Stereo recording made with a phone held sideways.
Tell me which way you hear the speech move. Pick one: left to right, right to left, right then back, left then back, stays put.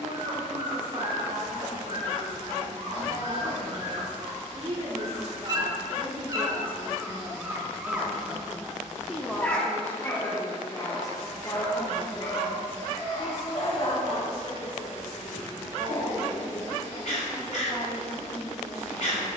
right to left.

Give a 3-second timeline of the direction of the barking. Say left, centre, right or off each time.
right, right, centre, left, left, left, left.